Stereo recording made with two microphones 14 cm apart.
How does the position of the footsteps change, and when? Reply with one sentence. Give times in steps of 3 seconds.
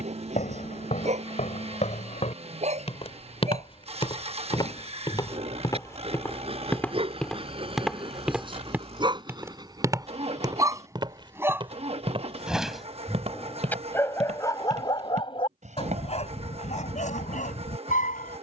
In this clip you hear the footsteps on the left from 0 s, in the centre from 6 s and on the right from 9 s.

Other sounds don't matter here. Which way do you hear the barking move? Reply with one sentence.
In this clip you hear the barking move from right to left.